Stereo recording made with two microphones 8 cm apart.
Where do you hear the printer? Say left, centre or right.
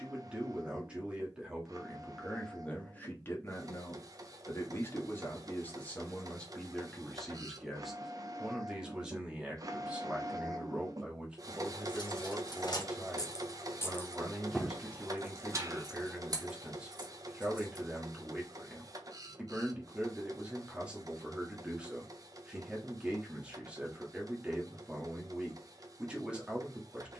right.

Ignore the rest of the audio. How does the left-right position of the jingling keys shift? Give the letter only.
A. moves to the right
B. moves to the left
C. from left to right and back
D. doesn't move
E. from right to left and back
A.